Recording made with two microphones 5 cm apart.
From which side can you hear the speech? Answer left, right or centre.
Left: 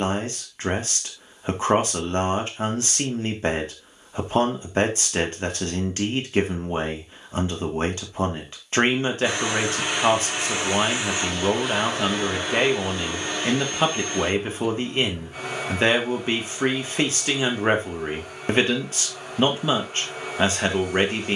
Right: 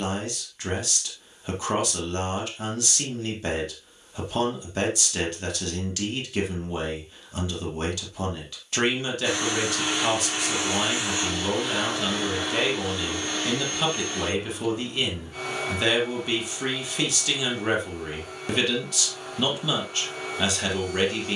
left.